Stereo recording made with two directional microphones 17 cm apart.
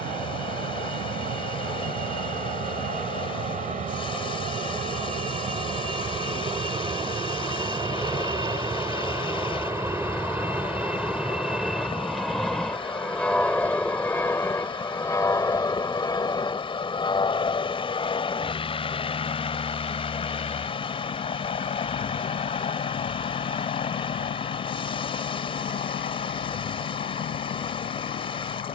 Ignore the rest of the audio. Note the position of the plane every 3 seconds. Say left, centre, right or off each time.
right, right, right, centre, centre, left, left, left, left, left.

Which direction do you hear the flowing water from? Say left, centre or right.
left.